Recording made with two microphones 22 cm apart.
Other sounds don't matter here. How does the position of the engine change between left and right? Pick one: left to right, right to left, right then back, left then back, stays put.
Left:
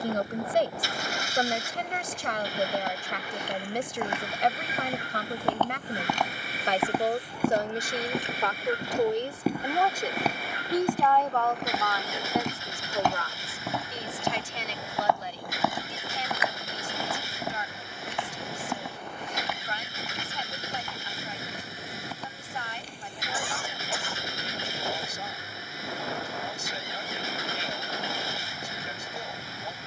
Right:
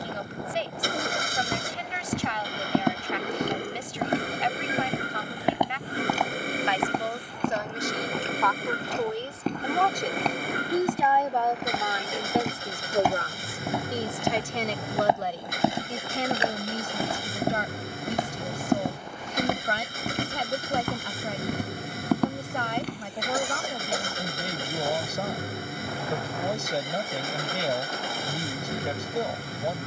stays put.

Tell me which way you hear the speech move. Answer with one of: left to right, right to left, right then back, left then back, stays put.
left to right.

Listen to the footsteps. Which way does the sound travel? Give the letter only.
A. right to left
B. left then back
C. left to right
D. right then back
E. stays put
B.